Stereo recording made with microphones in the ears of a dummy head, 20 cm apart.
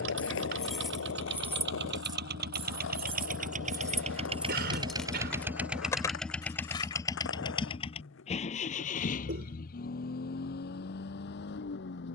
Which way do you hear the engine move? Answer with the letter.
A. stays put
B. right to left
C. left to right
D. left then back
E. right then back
B.